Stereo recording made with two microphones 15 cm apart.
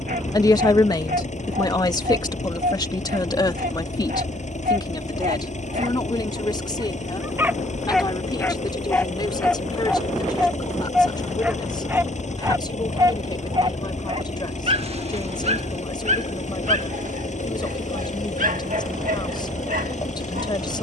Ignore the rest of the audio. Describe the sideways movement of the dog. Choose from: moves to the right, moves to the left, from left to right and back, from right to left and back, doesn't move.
from right to left and back.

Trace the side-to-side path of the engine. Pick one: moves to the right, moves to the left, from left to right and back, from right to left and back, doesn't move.
doesn't move.